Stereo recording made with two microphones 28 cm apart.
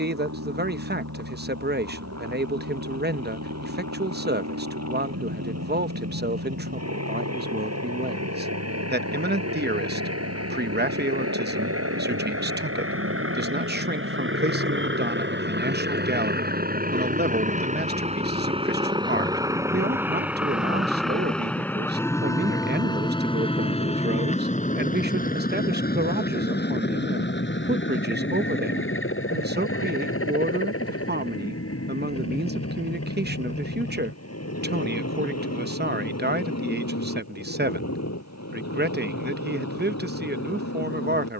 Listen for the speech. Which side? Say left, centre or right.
right.